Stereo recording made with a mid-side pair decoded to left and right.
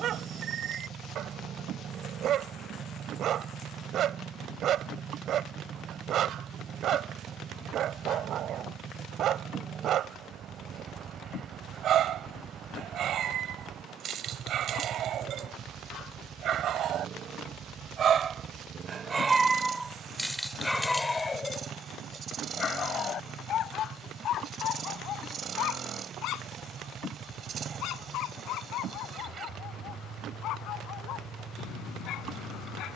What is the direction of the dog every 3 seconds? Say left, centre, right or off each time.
right, right, right, right, right, right, centre, left, left, left, left.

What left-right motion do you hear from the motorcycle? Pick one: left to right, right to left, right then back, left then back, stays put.
stays put.